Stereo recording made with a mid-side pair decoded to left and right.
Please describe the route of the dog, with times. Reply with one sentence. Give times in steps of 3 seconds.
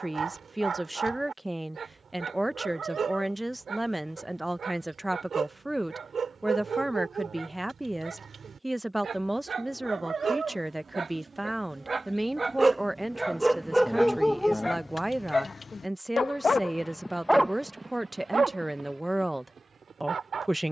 You can hear the dog on the right from 0 s, in the centre from 12 s, on the left from 15 s and on the right from 18 s.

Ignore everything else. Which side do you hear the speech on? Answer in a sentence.
You can hear the speech in the centre.